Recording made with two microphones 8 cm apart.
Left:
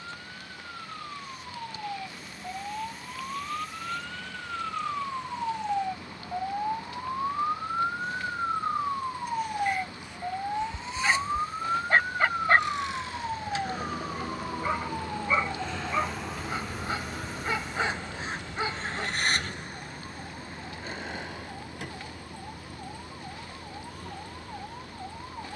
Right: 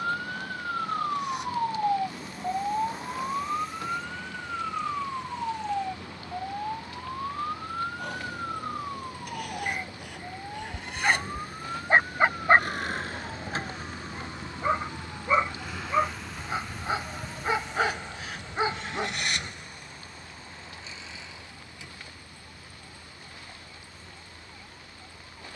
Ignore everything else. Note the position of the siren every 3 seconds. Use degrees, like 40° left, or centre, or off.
40° right, 10° right, 20° left, 30° left, 40° left, 50° left, 50° left, 50° left, 50° left.